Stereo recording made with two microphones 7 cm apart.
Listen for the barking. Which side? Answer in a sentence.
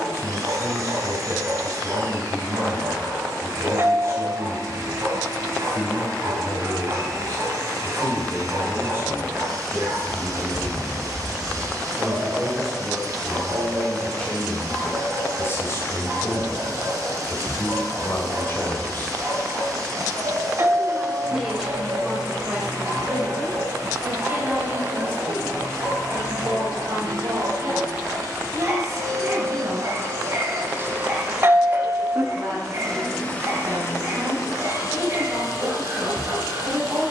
In this clip you hear the barking on the right.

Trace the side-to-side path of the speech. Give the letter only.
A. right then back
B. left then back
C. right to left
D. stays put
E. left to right
B.